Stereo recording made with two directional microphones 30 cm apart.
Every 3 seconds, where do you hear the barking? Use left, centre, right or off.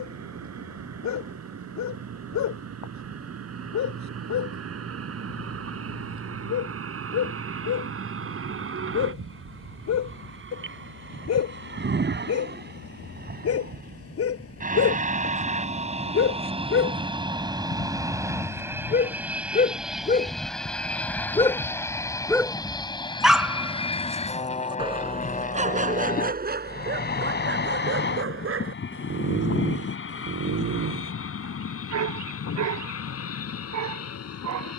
left, left, left, left, left, left, left, centre, right, right, right, right.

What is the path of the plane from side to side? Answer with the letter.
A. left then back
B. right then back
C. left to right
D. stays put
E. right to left
E.